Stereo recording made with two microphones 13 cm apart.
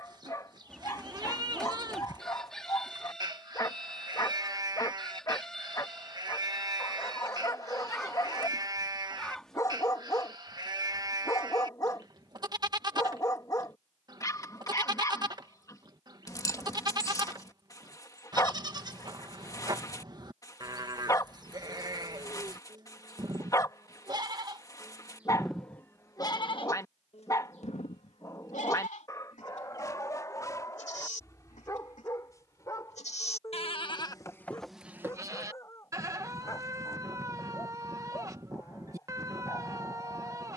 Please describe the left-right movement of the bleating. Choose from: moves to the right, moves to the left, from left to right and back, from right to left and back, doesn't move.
from right to left and back.